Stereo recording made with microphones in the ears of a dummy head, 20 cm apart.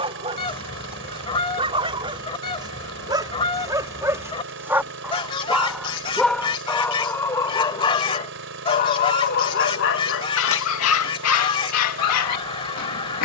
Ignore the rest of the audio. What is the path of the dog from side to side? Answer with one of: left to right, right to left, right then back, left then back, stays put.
right to left.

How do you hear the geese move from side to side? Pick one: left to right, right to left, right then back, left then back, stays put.
stays put.